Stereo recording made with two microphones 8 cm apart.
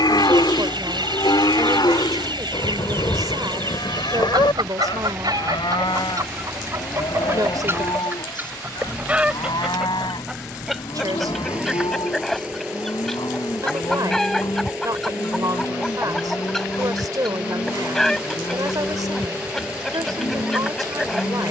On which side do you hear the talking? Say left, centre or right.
right.